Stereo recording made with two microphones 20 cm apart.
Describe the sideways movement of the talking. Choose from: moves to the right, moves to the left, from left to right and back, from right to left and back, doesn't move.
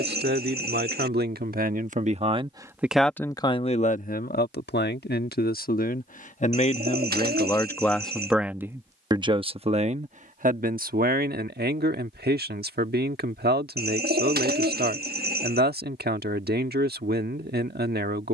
from right to left and back.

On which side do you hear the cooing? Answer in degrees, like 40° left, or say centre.
50° right.